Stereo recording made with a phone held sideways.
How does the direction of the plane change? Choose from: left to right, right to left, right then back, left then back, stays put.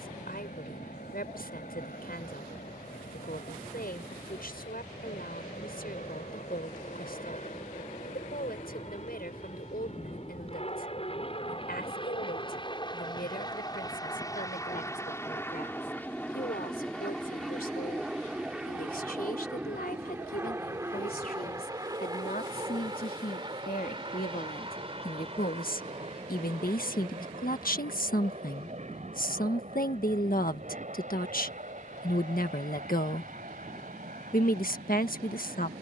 left to right.